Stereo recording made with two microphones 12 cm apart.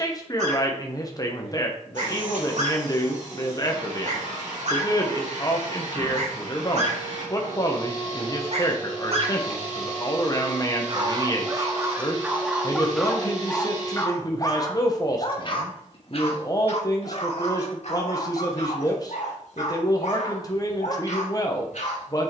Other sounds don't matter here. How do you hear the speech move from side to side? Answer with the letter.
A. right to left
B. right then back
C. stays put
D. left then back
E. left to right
C.